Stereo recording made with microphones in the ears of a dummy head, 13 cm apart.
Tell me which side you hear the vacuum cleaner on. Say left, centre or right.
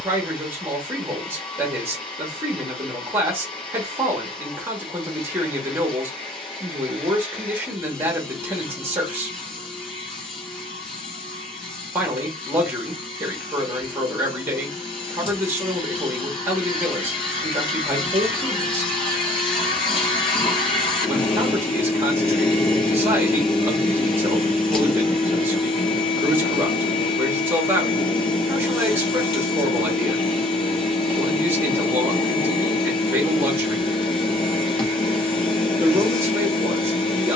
left.